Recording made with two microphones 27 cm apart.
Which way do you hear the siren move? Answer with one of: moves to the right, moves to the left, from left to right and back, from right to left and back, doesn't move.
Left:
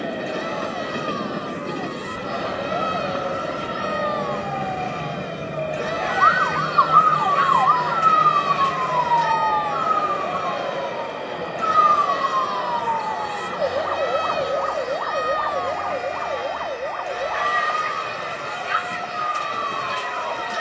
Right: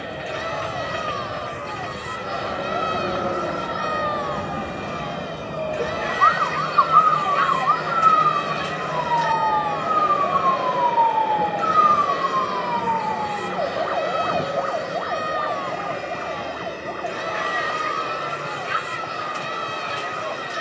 moves to the left.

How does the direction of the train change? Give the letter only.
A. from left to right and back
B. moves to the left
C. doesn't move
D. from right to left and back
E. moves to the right
E.